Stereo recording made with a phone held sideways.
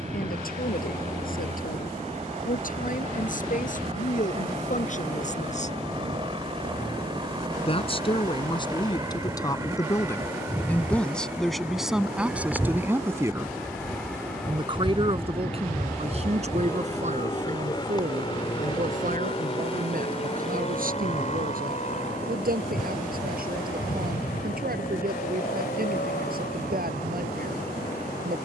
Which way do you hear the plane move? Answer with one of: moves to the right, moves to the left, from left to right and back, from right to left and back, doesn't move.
moves to the left.